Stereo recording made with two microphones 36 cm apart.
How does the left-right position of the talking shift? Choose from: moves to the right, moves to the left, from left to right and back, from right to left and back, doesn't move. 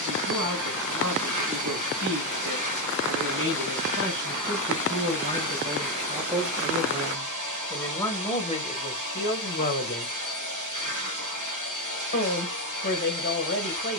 moves to the left.